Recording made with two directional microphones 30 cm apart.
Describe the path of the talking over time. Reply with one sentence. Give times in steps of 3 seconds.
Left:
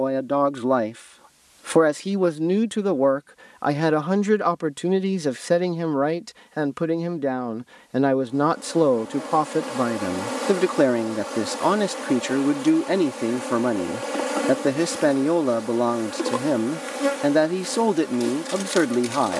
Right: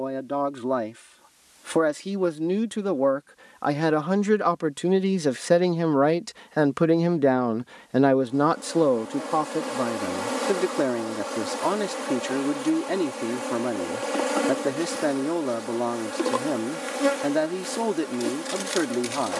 You can hear the talking on the left from 0 s, in the centre from 3 s and on the left from 9 s.